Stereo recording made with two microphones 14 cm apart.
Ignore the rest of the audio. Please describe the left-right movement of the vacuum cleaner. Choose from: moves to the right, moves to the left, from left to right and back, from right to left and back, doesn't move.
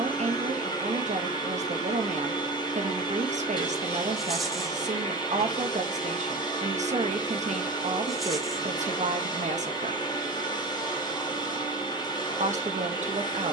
doesn't move.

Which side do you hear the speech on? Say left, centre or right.
right.